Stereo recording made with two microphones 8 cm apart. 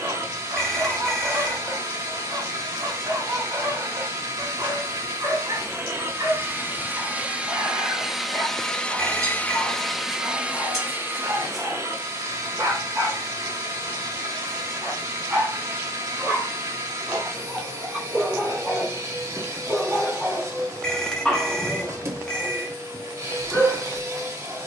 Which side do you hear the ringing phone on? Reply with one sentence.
You can hear the ringing phone in the centre.